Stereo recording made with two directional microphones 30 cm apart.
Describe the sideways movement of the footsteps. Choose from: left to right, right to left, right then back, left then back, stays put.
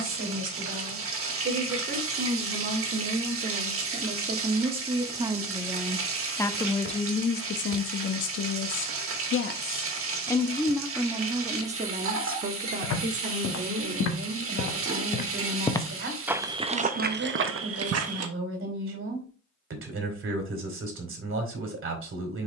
left to right.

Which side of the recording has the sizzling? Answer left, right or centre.
right.